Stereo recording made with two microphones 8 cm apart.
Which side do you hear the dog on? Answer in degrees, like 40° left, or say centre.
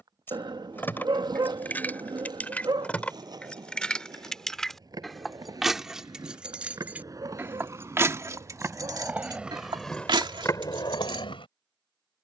60° right.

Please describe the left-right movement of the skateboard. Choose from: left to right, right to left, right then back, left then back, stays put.
right to left.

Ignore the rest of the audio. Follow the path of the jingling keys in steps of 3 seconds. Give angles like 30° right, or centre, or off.
20° left, centre, 20° right, 60° right.